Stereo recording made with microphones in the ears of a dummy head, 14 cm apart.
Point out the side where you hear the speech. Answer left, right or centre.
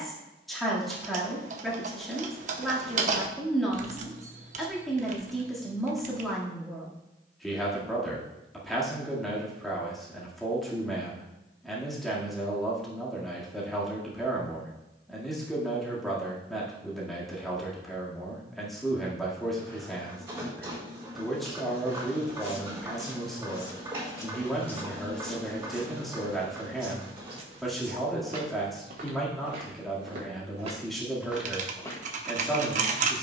centre.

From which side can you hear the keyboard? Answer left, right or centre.
right.